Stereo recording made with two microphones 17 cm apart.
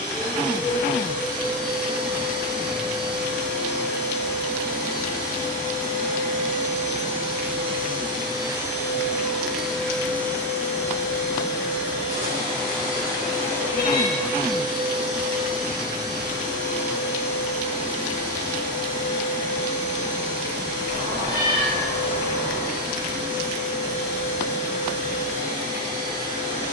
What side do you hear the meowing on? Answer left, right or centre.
right.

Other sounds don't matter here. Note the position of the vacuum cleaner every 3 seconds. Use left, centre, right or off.
right, right, right, centre, centre, right, right, right, right.